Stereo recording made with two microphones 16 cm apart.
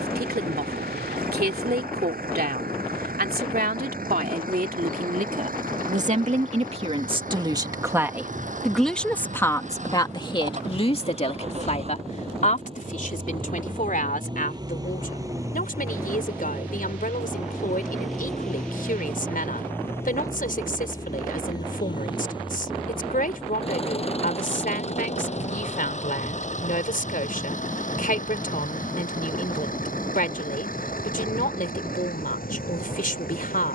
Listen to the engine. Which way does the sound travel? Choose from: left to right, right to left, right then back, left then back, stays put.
right to left.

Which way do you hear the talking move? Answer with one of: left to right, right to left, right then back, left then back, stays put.
right to left.